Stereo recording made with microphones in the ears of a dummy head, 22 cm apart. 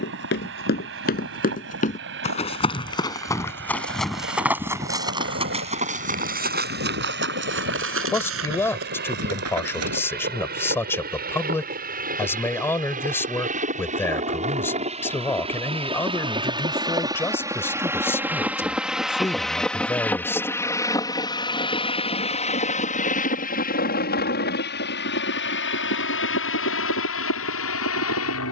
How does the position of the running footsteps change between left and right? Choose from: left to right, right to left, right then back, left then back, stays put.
left to right.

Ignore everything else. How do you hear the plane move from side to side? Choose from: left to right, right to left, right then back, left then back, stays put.
right to left.